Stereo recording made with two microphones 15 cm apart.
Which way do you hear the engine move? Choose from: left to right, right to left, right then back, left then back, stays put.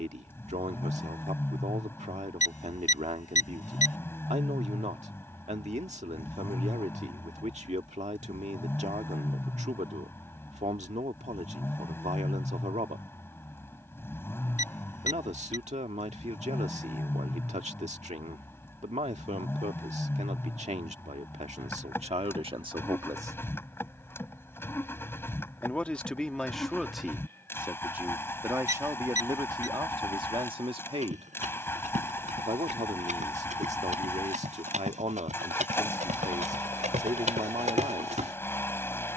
stays put.